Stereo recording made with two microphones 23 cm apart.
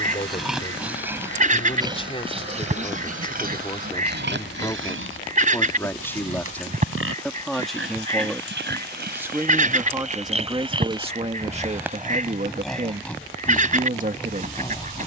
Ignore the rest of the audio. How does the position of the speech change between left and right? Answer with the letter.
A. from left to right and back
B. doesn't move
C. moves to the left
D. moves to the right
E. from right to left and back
D.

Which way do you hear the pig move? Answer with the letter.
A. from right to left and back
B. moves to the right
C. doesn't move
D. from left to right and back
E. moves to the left
D.